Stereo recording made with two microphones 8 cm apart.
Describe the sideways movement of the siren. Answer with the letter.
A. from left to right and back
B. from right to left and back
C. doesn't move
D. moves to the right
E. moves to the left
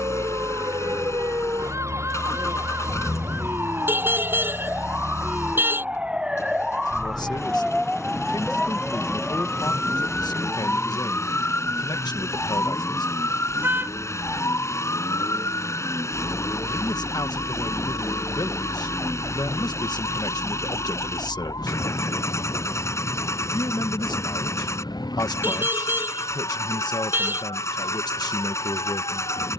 E.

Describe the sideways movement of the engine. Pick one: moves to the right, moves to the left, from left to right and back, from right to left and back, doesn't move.
doesn't move.